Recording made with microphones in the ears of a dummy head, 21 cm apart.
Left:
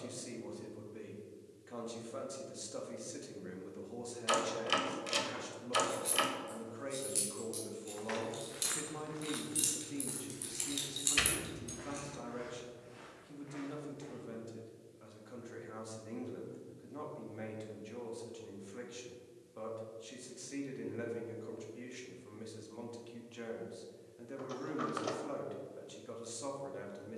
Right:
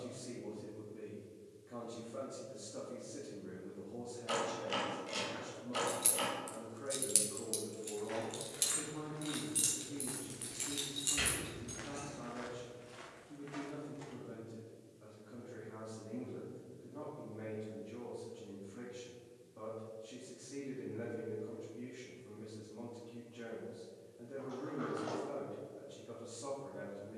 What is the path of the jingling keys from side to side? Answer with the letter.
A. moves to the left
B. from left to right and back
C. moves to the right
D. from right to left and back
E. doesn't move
A.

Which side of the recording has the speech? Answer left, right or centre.
left.